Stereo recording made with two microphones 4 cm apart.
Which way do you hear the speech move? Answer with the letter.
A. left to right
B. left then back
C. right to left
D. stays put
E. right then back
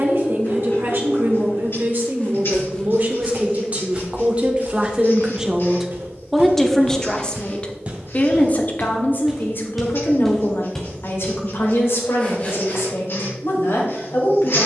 C.